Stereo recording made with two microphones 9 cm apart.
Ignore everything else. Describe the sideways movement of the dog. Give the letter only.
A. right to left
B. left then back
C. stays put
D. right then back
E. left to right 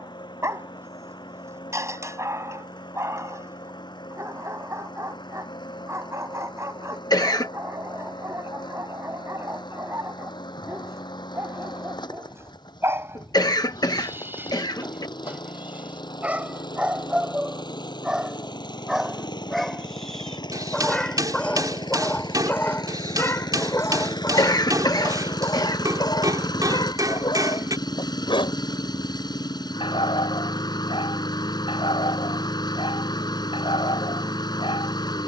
A.